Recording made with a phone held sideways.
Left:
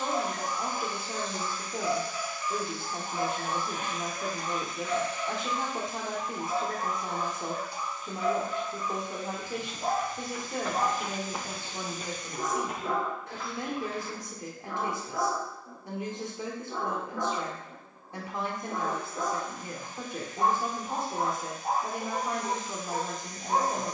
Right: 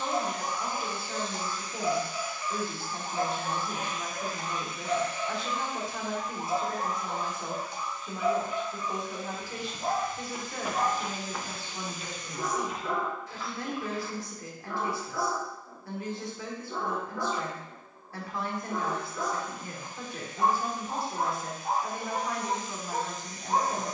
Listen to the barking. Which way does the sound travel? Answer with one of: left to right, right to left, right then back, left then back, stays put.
right to left.